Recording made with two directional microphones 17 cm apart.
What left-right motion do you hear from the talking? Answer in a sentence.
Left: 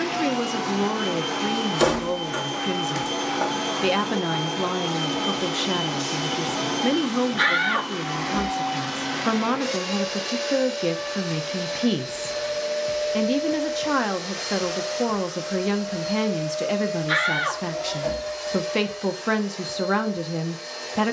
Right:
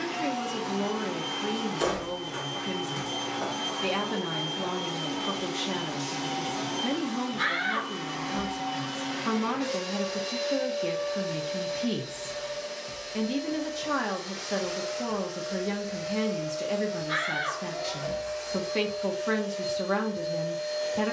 You can hear the talking stay in one place.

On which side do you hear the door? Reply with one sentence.
You can hear the door on the left.